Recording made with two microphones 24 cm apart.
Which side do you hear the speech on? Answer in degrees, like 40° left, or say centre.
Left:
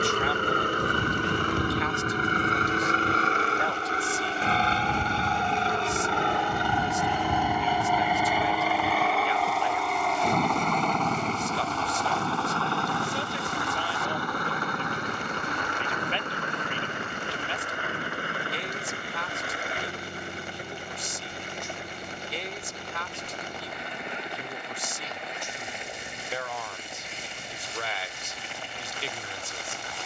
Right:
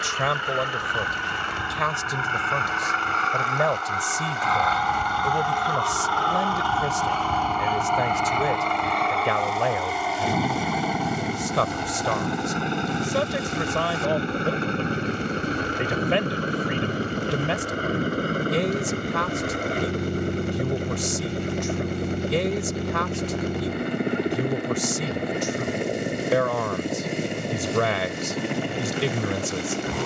80° right.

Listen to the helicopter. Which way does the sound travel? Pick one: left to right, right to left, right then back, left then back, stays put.
left to right.